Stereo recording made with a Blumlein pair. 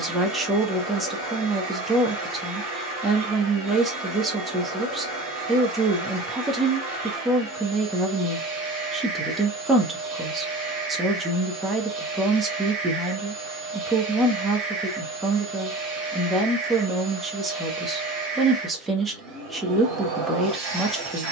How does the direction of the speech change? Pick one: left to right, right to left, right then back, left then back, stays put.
stays put.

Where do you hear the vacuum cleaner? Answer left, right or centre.
right.